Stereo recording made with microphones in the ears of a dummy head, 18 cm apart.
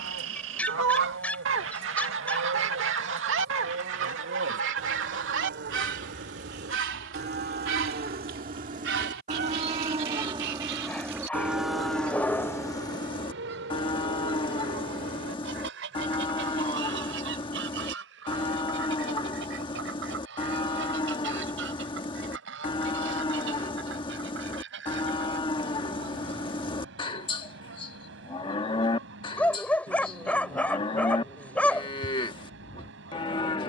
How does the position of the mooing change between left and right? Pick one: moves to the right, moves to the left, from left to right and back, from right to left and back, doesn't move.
moves to the left.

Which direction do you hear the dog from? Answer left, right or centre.
centre.